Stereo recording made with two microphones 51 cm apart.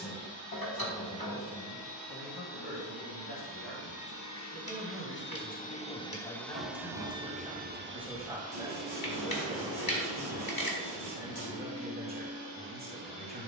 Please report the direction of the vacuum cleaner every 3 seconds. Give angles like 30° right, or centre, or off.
50° left, 30° left, 20° right, 50° right, 70° right.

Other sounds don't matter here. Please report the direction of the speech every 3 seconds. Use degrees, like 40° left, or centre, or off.
50° left, 30° left, centre, 20° right, 20° right.